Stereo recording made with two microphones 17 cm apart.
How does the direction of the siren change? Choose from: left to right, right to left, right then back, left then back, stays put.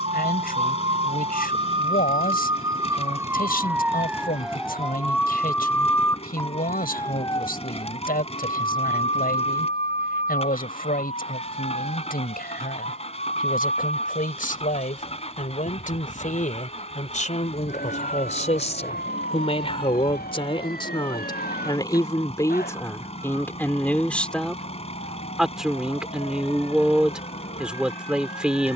right to left.